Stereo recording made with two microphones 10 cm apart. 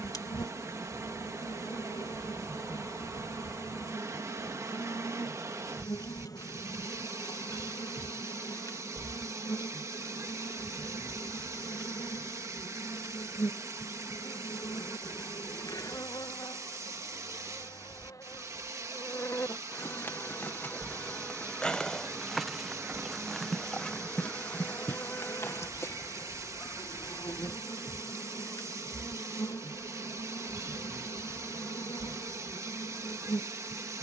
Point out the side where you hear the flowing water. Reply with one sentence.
In this clip you hear the flowing water on the right.